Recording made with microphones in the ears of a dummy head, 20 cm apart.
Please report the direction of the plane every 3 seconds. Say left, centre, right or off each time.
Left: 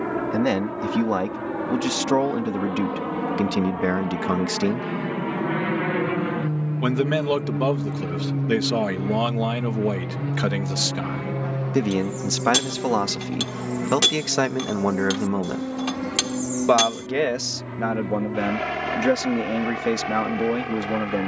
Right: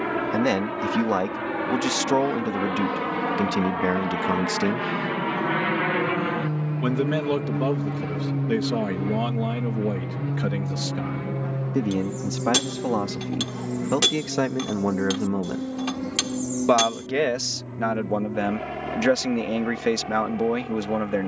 right, right, right, centre, left, left, left.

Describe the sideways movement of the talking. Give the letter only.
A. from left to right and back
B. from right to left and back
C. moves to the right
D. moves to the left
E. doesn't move
B.